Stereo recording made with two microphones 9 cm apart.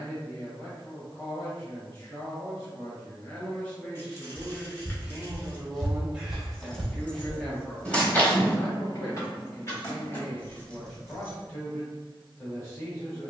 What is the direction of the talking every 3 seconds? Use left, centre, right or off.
left, centre, centre, left, left.